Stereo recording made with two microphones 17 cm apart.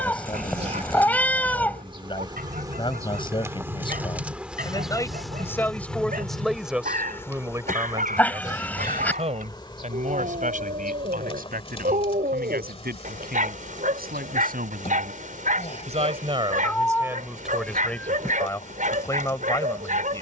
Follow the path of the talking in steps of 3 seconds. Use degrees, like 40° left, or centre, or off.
30° left, 20° left, 10° right, 50° right, 60° right, 20° right, 20° left.